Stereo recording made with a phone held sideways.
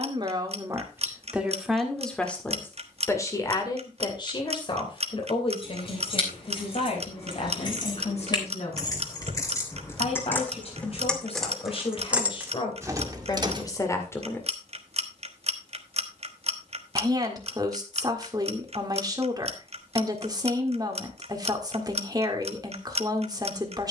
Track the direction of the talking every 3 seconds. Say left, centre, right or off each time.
centre, left, left, left, left, right, right, right.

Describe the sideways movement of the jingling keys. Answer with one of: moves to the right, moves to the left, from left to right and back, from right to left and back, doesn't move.
moves to the right.